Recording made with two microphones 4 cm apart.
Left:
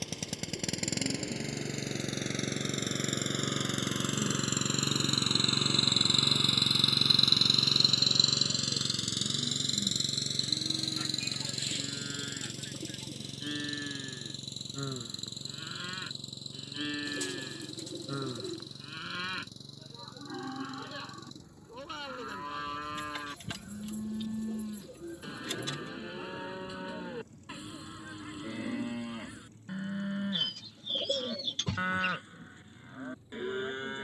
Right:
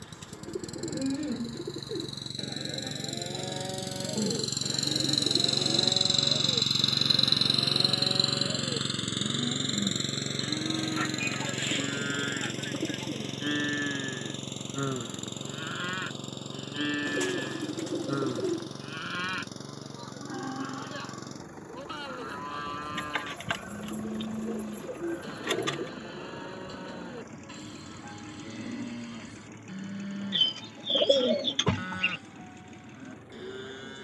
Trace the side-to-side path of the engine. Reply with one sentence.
In this clip you hear the engine move to the right.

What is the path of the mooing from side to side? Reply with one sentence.
You can hear the mooing move from right to left.